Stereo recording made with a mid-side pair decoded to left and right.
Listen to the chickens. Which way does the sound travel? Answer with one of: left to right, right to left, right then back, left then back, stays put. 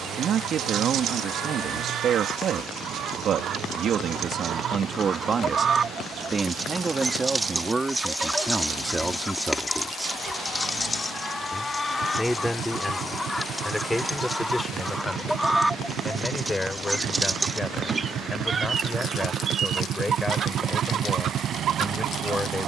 left then back.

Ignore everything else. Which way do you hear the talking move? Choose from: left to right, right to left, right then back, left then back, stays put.
right to left.